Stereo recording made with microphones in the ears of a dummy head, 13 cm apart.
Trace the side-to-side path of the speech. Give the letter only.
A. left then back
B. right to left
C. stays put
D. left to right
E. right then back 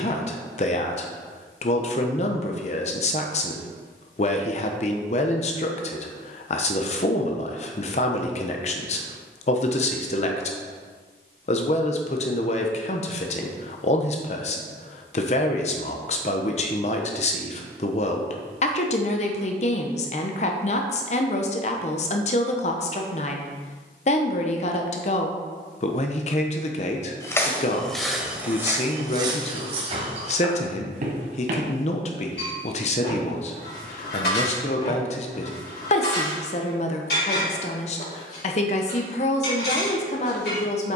C.